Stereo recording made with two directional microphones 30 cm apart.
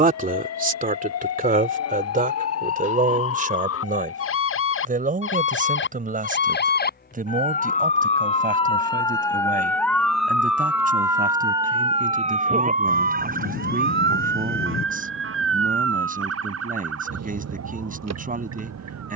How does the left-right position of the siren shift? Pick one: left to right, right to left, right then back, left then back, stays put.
left to right.